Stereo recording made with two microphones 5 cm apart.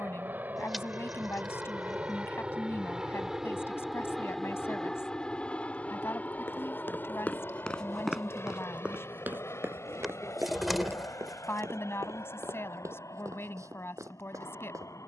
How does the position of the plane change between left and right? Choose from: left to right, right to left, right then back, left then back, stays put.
right to left.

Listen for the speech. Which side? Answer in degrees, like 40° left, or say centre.
50° left.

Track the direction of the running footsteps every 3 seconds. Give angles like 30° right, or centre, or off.
off, off, 10° left, 60° right, 70° right.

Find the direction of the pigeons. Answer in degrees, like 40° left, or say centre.
centre.